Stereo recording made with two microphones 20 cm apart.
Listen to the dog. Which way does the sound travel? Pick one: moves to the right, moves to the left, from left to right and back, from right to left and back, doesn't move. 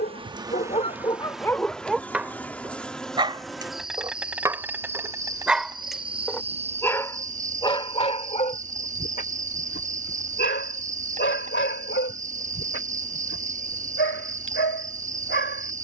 from left to right and back.